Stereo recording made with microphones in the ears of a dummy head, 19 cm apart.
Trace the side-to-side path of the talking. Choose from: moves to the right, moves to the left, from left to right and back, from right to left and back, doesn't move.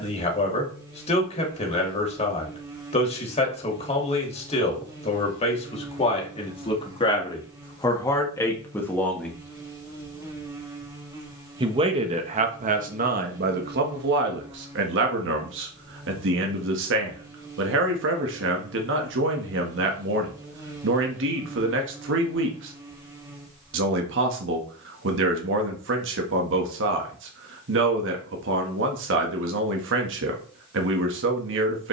moves to the right.